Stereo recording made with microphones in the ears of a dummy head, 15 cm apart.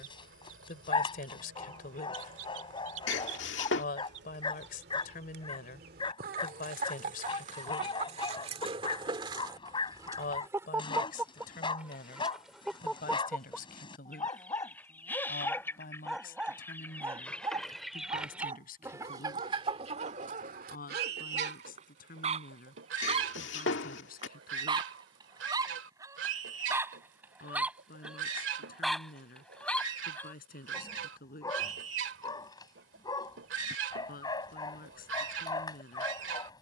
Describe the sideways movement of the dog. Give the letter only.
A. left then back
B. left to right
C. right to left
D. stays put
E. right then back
E.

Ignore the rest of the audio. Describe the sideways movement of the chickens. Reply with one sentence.
In this clip you hear the chickens go left and come back.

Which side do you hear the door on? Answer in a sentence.
You can hear the door on the left.